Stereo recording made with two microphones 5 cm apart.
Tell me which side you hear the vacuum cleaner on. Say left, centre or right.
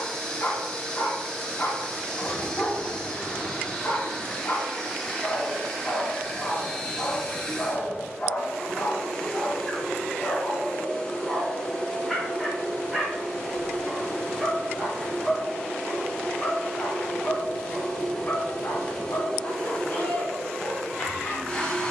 centre.